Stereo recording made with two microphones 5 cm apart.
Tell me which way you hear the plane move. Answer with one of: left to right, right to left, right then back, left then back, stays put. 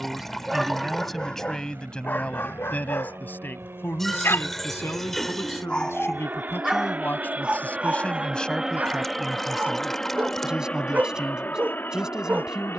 right to left.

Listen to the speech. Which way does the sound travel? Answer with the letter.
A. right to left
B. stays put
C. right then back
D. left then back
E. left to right
D.